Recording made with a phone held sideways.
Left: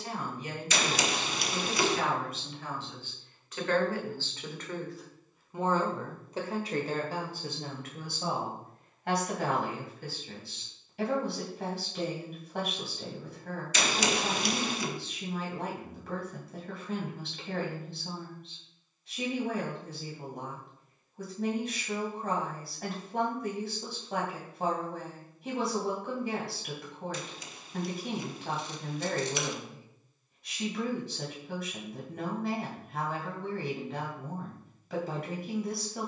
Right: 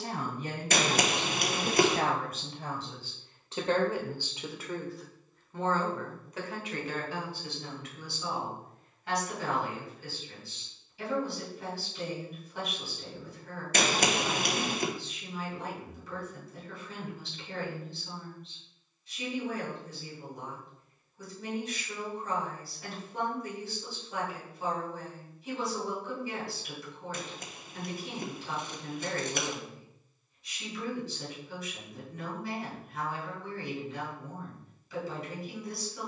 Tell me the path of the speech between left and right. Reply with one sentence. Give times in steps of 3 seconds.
In this clip you hear the speech on the right from 0 s, in the centre from 3 s and on the left from 6 s.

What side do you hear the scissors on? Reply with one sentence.
In this clip you hear the scissors on the right.